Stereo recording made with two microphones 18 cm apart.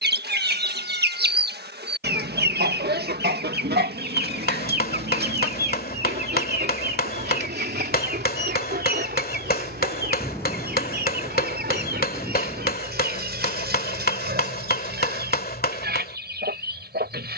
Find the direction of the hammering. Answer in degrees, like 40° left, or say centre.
60° left.